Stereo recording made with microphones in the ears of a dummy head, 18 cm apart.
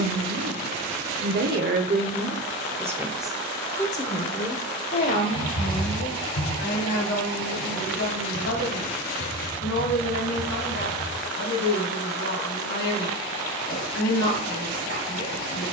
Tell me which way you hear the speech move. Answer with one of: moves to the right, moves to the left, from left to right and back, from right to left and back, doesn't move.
moves to the left.